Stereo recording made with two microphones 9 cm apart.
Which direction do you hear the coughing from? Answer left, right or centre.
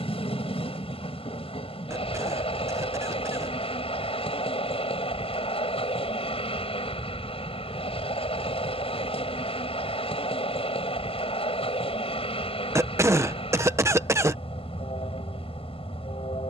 right.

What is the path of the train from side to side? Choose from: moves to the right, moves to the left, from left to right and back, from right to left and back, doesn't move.
doesn't move.